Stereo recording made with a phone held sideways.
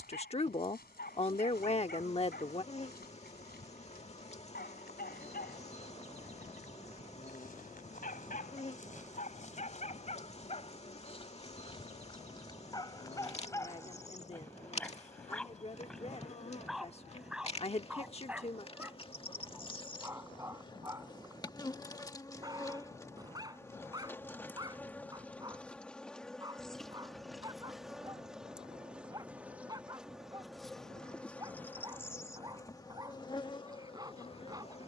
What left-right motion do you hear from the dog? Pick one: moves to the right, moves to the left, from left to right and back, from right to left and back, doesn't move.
moves to the right.